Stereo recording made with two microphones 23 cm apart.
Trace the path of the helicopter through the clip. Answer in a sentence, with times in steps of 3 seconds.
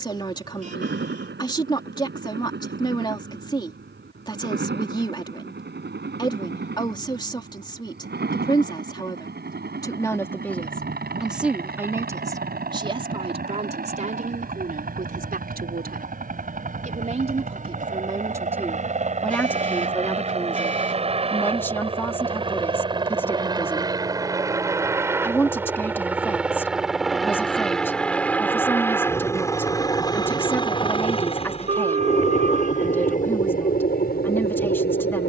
In this clip you hear the helicopter on the right from 0 s, in the centre from 24 s and on the left from 30 s.